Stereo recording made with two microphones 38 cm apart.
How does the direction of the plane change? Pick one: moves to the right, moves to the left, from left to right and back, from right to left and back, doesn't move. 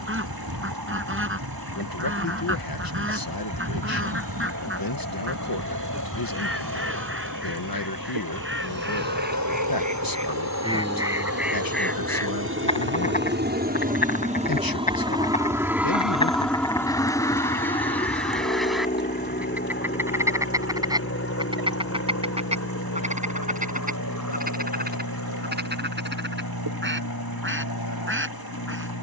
moves to the left.